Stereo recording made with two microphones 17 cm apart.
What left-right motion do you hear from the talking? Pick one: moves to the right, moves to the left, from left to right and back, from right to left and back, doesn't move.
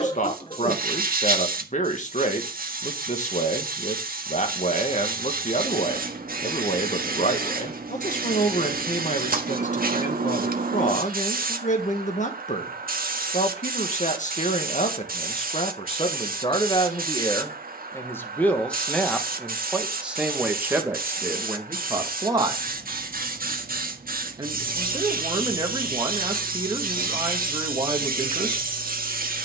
moves to the right.